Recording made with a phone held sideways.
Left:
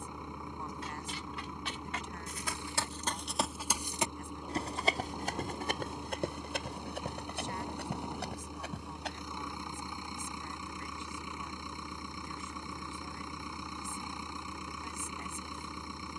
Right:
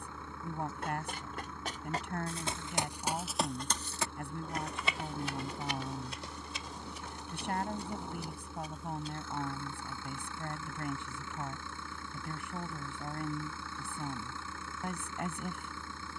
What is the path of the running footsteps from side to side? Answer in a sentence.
In this clip you hear the running footsteps move to the left.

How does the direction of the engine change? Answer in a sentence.
You can hear the engine stay put.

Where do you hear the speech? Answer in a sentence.
In this clip you hear the speech on the right.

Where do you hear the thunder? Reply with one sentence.
In this clip you hear the thunder in the centre.